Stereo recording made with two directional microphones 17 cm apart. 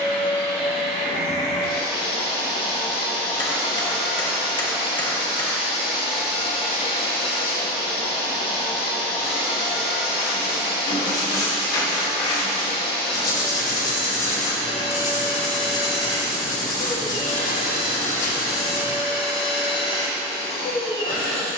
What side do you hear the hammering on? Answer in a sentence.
In this clip you hear the hammering on the left.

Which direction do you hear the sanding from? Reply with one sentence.
In this clip you hear the sanding on the left.